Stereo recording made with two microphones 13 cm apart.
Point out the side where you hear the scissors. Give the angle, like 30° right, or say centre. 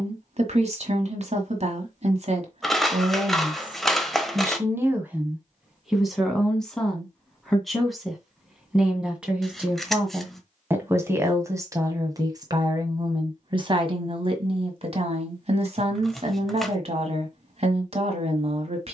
centre.